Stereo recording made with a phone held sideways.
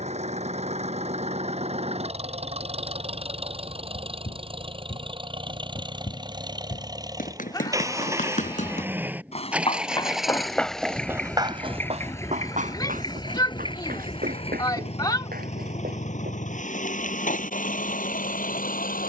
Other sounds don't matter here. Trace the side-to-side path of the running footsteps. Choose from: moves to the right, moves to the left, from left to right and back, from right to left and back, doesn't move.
moves to the right.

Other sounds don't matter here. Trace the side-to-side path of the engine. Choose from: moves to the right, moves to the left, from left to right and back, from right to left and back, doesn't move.
moves to the left.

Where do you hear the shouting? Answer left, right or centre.
left.